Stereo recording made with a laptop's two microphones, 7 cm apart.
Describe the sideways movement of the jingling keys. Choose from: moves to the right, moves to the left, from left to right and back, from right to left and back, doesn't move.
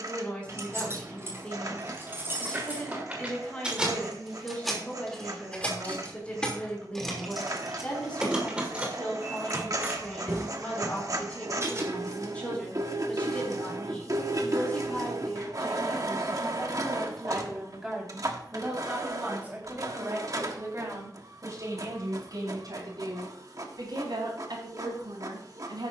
from right to left and back.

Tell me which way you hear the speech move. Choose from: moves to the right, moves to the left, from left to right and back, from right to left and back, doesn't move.
moves to the right.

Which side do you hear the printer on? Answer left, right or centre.
right.